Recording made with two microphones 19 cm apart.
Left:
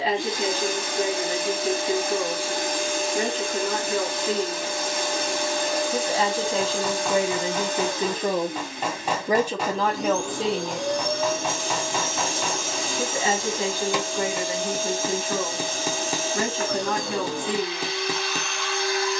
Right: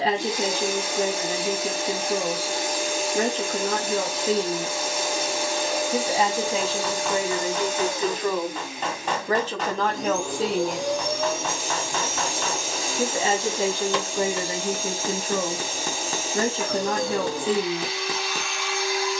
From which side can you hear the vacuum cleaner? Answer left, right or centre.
centre.